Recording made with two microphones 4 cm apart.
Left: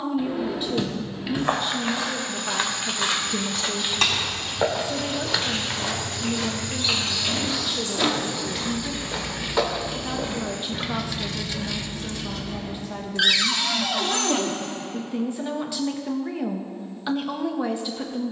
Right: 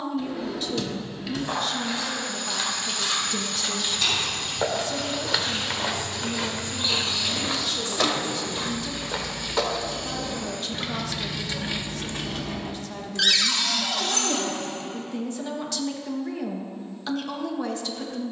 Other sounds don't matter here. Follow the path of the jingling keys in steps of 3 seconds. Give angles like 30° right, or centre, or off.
off, 60° left, 50° left, 10° left, 60° right, off.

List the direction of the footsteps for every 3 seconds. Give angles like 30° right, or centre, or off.
50° left, 10° left, 30° right, 20° left, off, off.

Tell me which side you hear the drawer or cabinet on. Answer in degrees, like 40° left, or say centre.
20° left.